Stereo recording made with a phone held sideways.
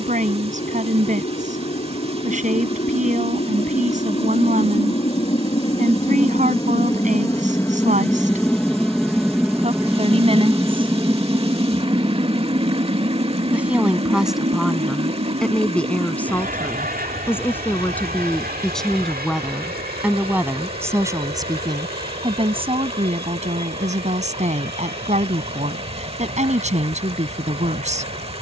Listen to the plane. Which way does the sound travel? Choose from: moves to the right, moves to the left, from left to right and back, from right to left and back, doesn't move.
moves to the right.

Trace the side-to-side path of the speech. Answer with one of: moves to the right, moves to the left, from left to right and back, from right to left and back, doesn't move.
from right to left and back.